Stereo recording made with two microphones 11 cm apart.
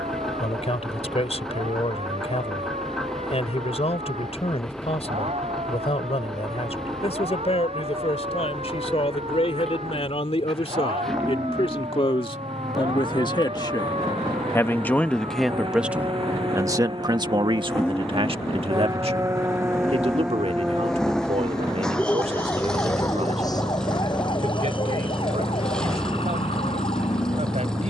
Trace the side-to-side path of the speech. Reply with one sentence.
You can hear the speech move to the right.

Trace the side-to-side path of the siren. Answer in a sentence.
In this clip you hear the siren move to the left.